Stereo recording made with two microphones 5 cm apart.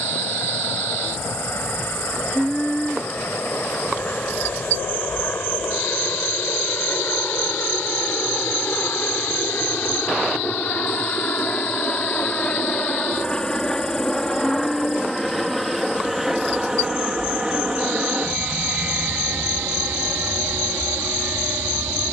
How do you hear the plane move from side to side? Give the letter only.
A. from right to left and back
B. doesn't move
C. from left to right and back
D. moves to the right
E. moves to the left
D.